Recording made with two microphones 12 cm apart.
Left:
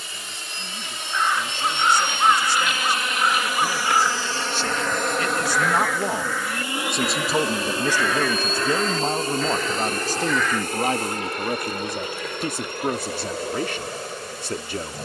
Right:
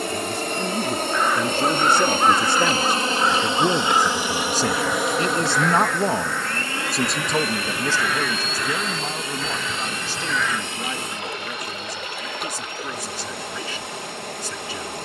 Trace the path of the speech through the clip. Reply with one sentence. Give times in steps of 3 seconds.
In this clip you hear the speech on the right from 0 s, in the centre from 6 s and on the left from 9 s.